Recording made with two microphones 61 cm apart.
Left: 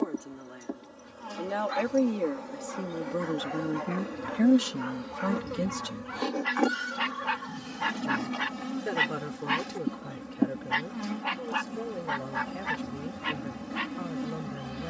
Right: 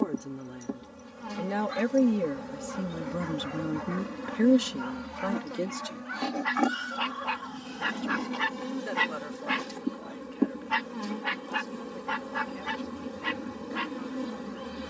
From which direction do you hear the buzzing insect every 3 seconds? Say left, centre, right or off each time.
right, right, centre, centre, centre.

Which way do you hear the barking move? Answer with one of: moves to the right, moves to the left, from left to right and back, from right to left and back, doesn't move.
moves to the right.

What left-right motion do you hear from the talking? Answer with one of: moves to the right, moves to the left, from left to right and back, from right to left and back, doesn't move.
moves to the left.